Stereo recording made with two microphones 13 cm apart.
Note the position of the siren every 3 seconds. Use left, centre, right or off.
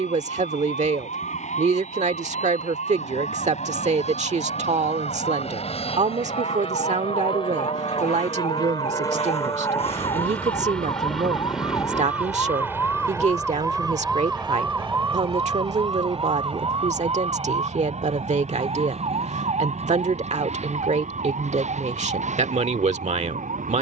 left, left, left, left, centre, right, right, right.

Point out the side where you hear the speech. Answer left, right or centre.
right.